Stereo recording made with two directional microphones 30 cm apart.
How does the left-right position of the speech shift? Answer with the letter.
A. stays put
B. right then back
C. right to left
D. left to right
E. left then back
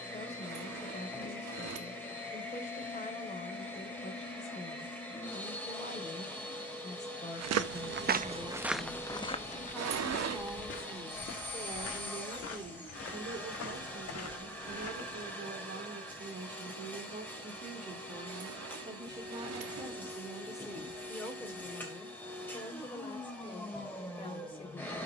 B.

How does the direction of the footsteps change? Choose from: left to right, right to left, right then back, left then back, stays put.
right to left.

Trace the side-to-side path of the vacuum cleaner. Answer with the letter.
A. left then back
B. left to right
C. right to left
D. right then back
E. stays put
E.